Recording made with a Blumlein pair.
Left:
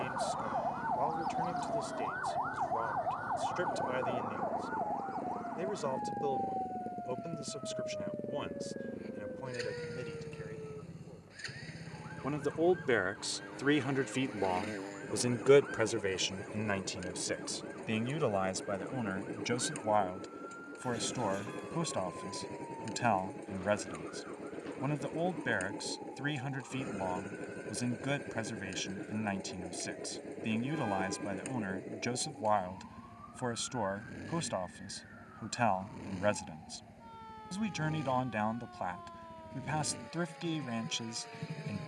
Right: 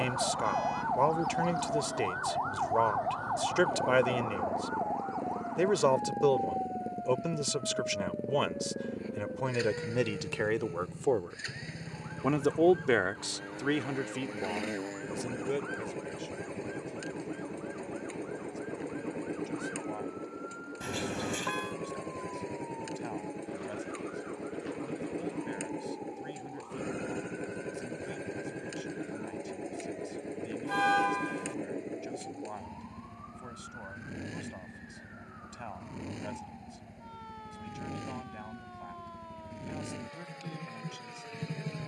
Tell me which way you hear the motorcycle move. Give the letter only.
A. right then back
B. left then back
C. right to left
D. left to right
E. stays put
E.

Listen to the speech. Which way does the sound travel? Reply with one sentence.
In this clip you hear the speech go from the right side to the left.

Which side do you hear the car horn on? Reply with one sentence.
You can hear the car horn on the right.